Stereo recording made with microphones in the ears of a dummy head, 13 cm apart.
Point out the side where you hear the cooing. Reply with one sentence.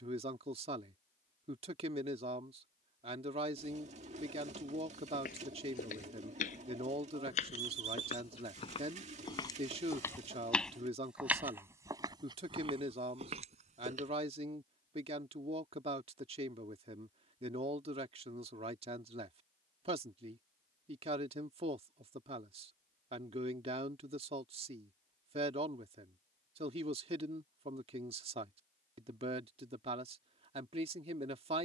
You can hear the cooing on the right.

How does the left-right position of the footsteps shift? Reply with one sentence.
You can hear the footsteps travel towards the right.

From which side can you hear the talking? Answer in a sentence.
In this clip you hear the talking on the right.